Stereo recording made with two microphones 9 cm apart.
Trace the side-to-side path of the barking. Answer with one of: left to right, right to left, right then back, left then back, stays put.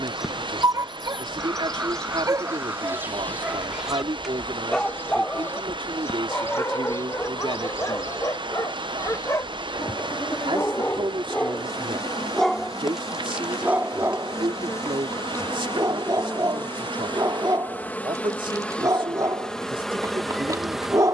left then back.